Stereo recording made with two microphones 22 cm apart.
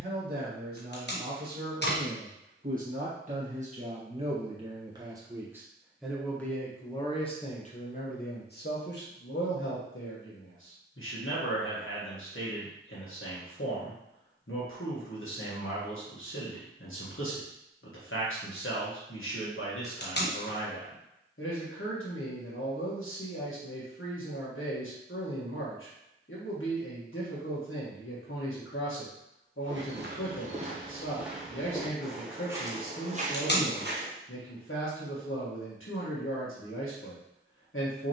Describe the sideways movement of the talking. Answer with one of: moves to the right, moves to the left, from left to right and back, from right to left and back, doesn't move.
moves to the left.